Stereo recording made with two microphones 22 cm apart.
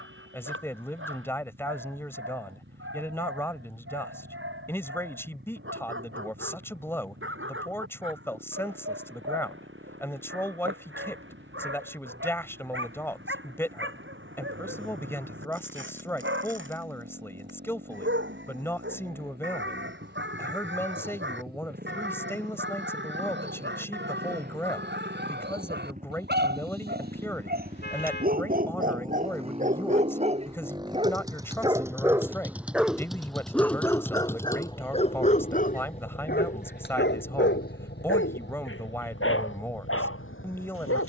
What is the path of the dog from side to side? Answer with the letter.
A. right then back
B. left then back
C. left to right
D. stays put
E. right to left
E.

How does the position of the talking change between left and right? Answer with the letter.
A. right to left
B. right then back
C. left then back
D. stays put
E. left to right
D.